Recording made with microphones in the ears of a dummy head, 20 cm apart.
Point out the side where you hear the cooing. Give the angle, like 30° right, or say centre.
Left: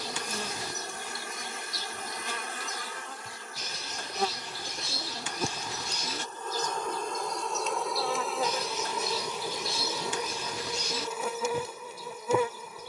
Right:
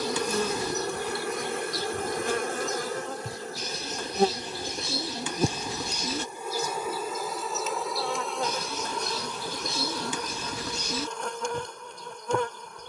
80° right.